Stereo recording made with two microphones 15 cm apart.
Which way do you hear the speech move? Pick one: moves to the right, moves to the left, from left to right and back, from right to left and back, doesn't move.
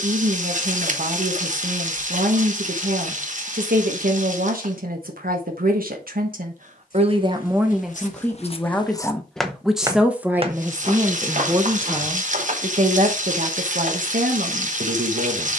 from right to left and back.